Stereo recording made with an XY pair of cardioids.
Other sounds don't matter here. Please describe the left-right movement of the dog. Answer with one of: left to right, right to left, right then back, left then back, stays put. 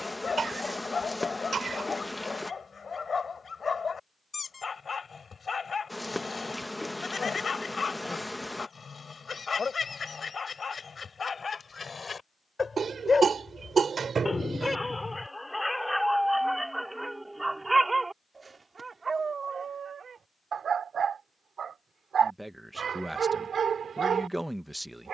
left to right.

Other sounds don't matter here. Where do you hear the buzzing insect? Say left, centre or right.
centre.